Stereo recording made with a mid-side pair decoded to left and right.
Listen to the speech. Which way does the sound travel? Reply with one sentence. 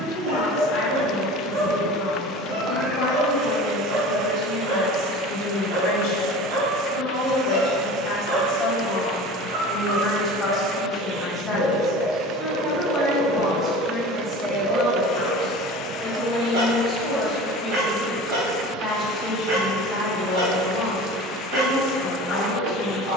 In this clip you hear the speech go right and come back.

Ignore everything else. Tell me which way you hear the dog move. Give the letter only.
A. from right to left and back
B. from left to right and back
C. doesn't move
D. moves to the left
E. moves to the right
C.